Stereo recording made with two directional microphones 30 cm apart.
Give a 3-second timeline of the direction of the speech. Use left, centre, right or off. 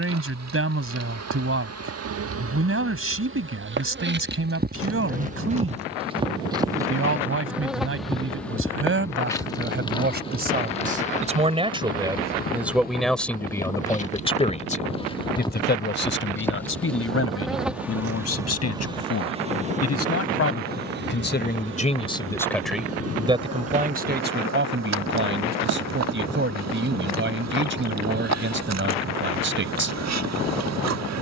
right, right, right, right, centre, left, left, centre, right, right, off.